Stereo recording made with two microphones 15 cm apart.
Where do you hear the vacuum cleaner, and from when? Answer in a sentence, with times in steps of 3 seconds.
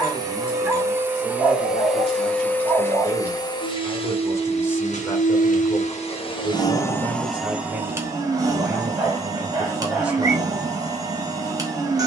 You can hear the vacuum cleaner in the centre from 0 s, on the left from 3 s, in the centre from 6 s and on the right from 9 s.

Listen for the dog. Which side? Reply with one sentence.
You can hear the dog in the centre.